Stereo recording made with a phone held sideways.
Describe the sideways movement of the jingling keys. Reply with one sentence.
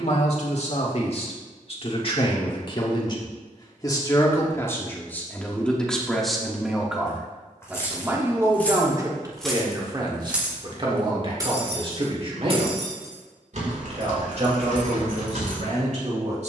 In this clip you hear the jingling keys travel towards the right.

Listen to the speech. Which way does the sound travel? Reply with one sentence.
In this clip you hear the speech move from left to right.